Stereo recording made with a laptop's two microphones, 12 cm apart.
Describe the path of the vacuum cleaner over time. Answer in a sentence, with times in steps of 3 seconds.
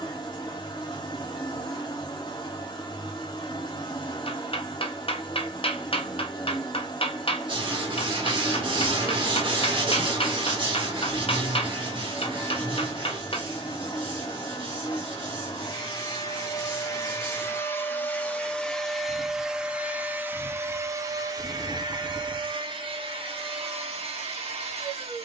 In this clip you hear the vacuum cleaner on the left from 0 s, in the centre from 18 s and on the right from 21 s.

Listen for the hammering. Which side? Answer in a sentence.
In this clip you hear the hammering on the left.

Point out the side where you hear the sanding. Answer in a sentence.
In this clip you hear the sanding on the right.